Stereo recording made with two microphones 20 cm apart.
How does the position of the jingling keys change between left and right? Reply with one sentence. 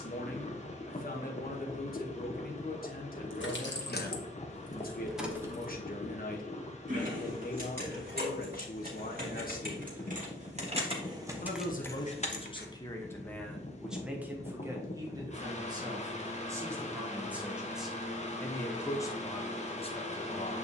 You can hear the jingling keys go right and come back.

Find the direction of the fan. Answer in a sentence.
You can hear the fan on the left.